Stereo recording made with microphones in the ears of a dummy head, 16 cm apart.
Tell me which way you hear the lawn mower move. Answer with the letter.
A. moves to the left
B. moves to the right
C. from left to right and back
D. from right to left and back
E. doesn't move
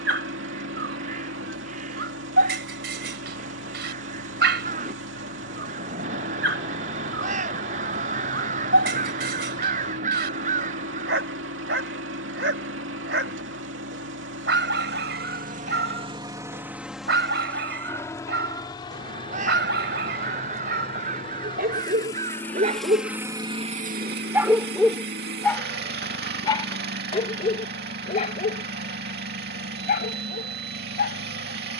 D.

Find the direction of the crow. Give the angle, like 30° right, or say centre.
40° right.